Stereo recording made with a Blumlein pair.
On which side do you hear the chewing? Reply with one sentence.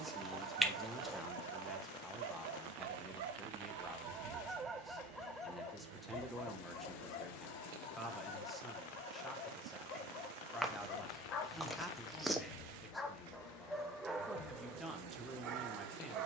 In this clip you hear the chewing in the centre.